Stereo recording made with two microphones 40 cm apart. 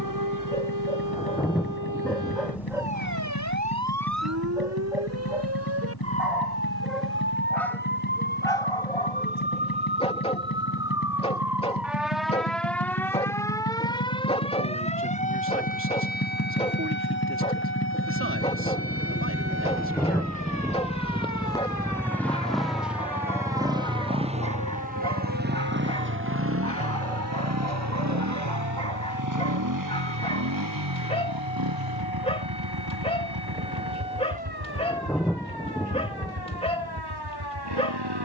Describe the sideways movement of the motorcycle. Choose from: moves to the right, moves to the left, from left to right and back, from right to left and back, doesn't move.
moves to the right.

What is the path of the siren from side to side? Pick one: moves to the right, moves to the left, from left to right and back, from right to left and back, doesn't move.
moves to the left.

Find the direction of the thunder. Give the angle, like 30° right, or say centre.
centre.